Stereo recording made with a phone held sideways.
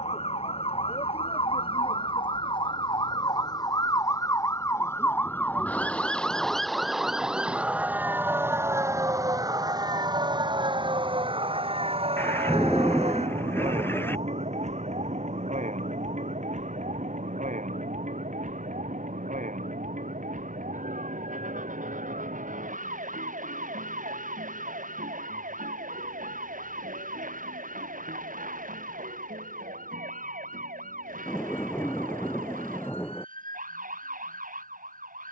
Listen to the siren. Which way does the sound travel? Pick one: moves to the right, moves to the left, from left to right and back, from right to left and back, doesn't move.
moves to the right.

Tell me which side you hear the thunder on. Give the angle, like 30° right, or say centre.
20° left.